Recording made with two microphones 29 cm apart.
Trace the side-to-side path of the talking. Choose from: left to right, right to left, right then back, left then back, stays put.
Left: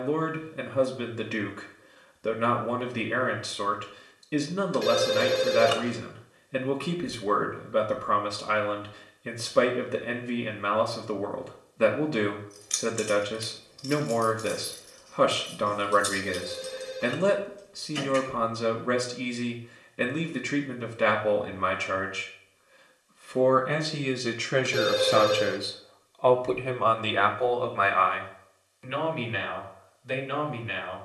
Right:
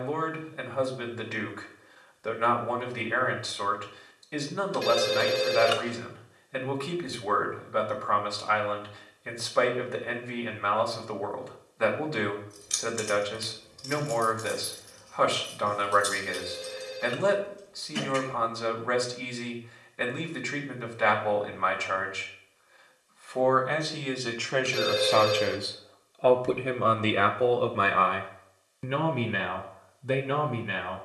left to right.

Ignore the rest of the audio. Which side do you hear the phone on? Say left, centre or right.
left.